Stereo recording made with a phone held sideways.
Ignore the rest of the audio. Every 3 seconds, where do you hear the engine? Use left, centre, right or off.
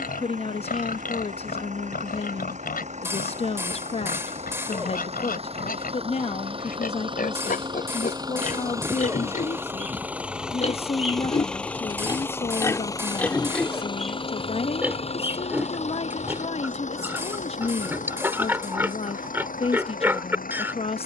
right, right, right, centre, left, left, left.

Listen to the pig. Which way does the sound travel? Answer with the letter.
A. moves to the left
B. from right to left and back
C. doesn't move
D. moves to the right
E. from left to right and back
D.